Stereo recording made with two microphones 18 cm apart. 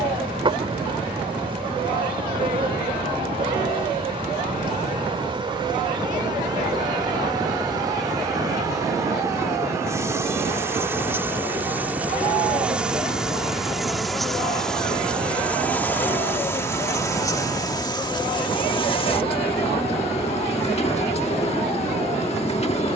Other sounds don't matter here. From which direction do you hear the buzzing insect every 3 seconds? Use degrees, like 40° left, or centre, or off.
30° right, 30° right, 20° right, 10° right, centre, 10° left, 30° left, 40° left.